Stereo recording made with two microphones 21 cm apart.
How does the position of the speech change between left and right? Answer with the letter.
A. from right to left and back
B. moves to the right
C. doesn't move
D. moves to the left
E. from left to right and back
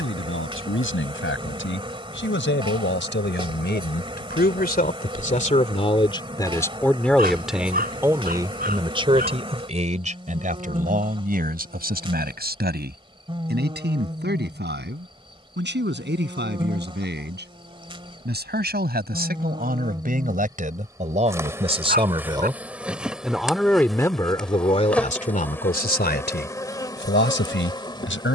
E.